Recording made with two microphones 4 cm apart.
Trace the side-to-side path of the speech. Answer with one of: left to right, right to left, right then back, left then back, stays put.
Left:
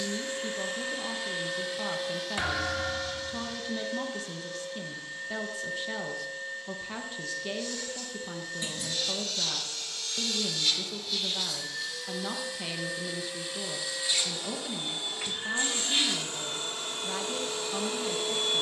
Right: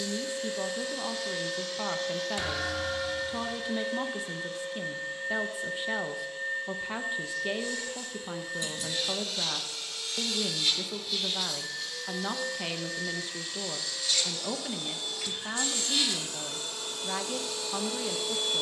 stays put.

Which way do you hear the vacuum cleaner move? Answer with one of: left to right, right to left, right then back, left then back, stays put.
right then back.